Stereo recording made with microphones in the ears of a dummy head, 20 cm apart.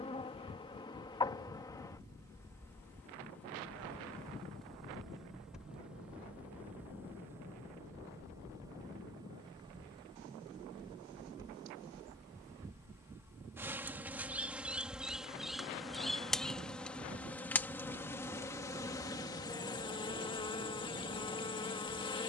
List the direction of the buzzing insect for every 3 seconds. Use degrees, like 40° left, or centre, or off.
20° left, centre, 10° right, 20° right, 10° right, centre, 20° left, 20° left.